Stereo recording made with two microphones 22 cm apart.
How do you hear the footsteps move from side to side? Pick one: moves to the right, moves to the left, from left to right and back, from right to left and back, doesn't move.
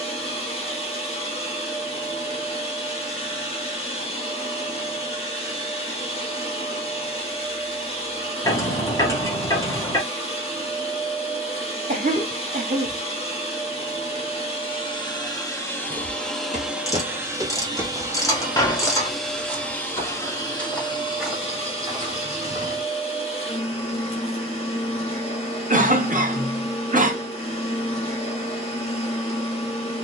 from right to left and back.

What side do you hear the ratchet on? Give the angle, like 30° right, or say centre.
10° left.